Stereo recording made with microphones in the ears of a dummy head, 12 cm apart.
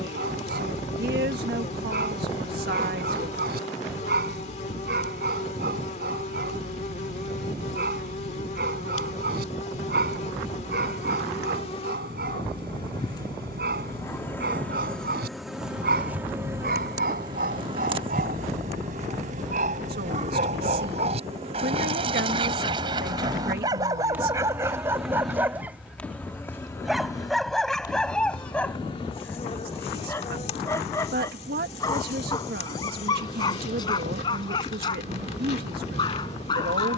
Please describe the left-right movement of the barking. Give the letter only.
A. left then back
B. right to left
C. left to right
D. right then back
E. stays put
B.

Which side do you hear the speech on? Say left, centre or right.
right.